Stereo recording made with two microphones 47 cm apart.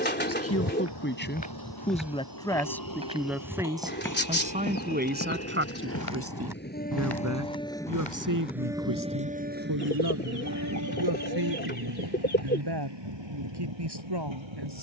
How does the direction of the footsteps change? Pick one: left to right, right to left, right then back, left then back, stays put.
right then back.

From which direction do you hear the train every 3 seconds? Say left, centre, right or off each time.
left, left, centre, right, right.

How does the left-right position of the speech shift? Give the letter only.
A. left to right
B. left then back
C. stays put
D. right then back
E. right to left
A.